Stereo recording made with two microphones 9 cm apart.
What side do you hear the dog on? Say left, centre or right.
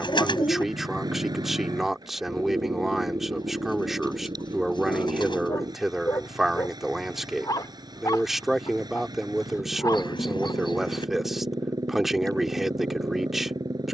left.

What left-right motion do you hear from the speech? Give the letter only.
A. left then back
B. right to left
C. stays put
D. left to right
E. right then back
C.